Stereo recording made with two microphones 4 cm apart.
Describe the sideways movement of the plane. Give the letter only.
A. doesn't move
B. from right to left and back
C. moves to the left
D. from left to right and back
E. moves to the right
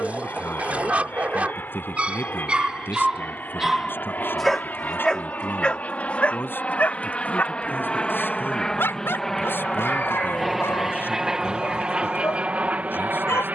E.